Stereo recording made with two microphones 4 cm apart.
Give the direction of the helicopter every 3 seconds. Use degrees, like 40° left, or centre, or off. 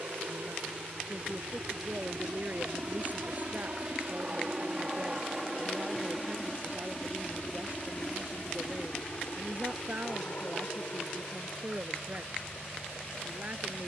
60° right, 20° right, 20° left, 50° left, 60° left.